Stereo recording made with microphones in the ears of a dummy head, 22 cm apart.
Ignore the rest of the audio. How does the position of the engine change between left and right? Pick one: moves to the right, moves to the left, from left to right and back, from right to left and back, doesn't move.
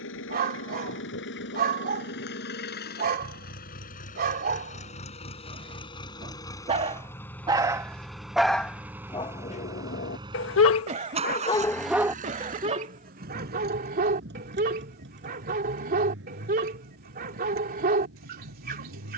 moves to the right.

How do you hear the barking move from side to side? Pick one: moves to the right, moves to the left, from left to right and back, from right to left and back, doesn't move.
from right to left and back.